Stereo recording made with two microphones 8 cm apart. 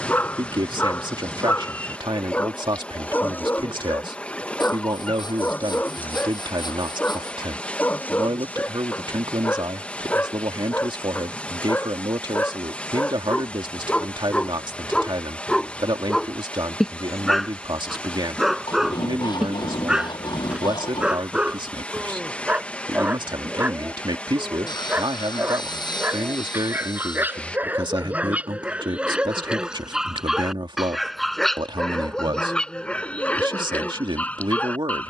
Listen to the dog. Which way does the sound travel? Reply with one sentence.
You can hear the dog go right and come back.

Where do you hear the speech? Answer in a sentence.
In this clip you hear the speech on the right.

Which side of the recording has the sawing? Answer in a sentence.
In this clip you hear the sawing on the left.